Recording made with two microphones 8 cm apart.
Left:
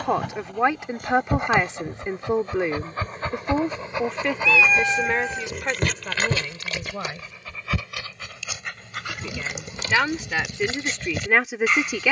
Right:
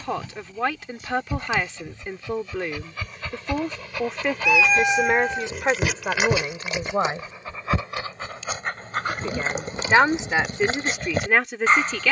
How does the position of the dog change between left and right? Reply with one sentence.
You can hear the dog move to the right.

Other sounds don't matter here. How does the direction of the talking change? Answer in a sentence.
You can hear the talking move from left to right and back again.